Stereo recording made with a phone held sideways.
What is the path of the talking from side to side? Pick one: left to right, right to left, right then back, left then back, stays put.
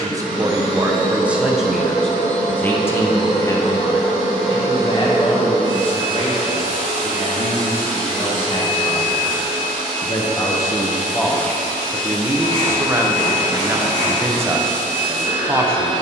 left then back.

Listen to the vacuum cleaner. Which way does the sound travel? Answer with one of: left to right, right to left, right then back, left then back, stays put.
stays put.